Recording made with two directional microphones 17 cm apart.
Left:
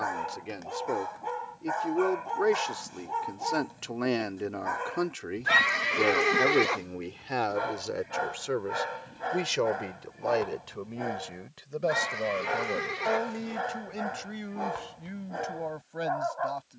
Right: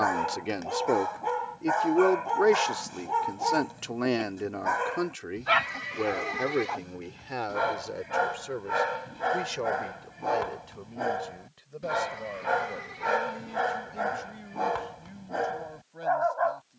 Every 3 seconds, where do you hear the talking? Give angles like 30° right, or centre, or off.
30° right, centre, 20° left, 40° left, 50° left, 50° left.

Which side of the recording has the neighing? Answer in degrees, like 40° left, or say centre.
50° left.